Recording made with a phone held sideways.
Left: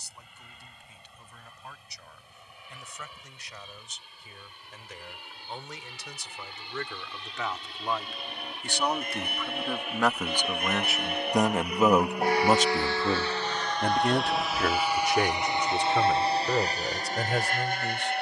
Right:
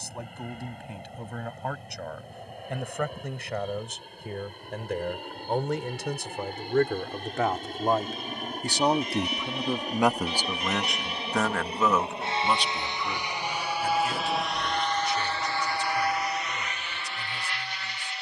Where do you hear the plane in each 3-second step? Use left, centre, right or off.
right, right, right, right, centre, left.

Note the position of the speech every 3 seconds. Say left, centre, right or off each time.
right, right, right, centre, left, left.